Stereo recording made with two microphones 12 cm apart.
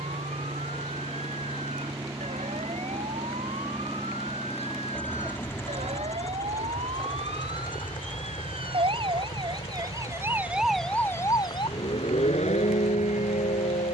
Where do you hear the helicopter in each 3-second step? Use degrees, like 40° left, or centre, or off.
40° right, centre, 40° left, 50° left, 60° left.